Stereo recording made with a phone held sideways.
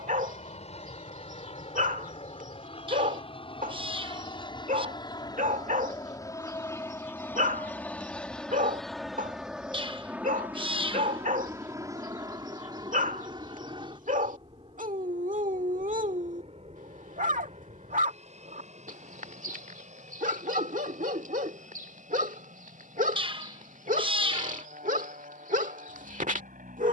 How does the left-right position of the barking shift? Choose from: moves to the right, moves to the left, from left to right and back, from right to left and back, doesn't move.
doesn't move.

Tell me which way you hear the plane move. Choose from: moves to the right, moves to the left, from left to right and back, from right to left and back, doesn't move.
moves to the right.